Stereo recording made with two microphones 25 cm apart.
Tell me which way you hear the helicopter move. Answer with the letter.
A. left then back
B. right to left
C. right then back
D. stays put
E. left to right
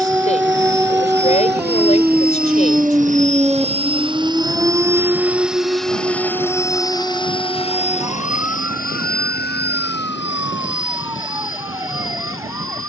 B.